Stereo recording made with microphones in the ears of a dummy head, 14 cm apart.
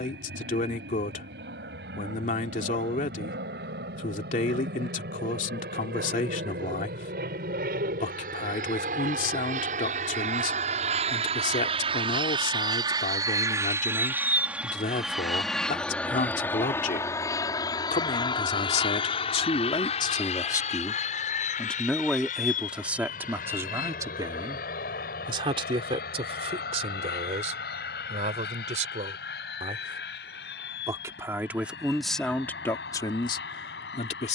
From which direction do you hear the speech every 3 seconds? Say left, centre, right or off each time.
left, left, left, left, left, left, left, centre, right, right, centre, left.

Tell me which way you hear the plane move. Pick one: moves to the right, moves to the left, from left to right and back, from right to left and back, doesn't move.
moves to the left.